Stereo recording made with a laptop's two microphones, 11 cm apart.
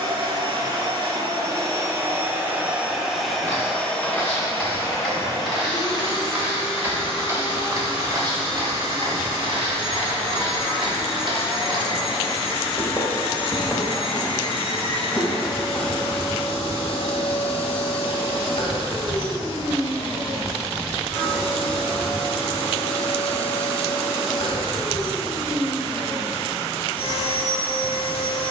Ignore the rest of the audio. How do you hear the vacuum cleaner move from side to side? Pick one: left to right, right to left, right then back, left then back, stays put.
right to left.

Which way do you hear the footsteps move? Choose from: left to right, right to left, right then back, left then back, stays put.
right then back.